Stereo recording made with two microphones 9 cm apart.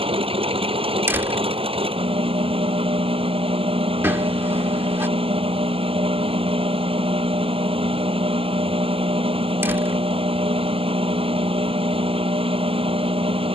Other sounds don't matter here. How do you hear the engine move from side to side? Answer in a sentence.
In this clip you hear the engine stay put.